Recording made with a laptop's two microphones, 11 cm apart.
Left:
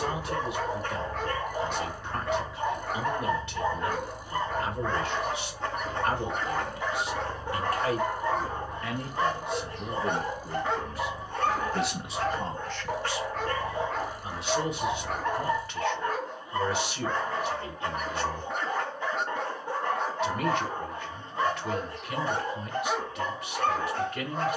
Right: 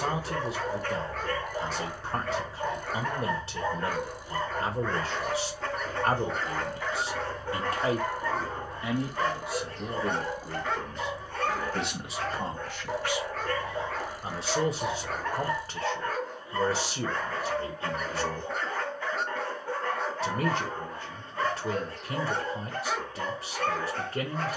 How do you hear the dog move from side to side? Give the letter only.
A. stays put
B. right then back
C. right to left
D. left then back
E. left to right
A.